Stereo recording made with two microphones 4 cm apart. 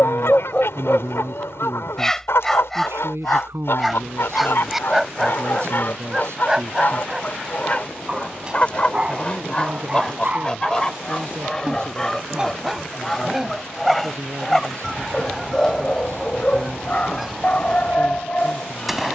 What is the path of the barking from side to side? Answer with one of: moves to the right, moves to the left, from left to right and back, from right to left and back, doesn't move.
from left to right and back.